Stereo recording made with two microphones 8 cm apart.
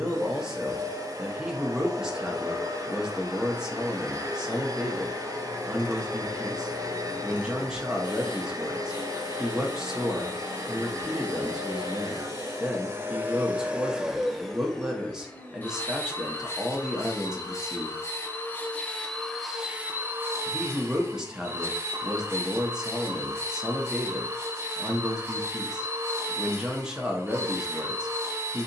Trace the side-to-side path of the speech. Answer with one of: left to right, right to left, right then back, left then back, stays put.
stays put.